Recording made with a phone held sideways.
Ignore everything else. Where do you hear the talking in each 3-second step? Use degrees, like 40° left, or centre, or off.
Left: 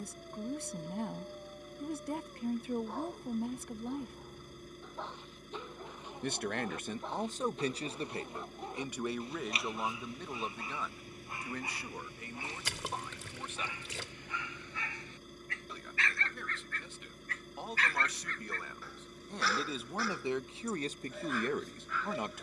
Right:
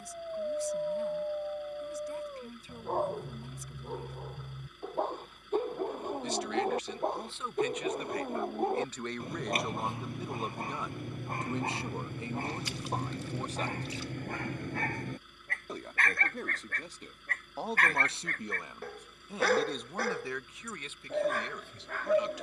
60° left, 60° left, 40° left, 10° right, 30° right, 40° right, centre, 50° left.